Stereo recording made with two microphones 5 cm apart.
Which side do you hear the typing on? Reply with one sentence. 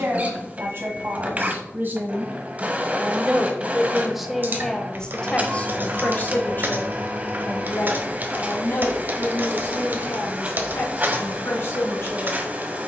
In this clip you hear the typing on the right.